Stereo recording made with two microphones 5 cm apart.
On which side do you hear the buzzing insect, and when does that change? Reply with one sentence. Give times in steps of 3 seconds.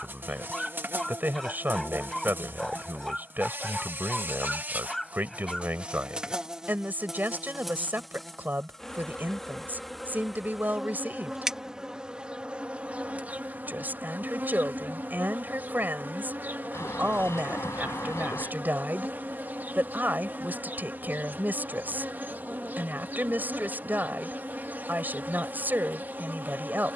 In this clip you hear the buzzing insect on the right from 0 s, in the centre from 6 s and on the right from 12 s.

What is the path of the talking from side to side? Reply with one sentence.
In this clip you hear the talking stay put.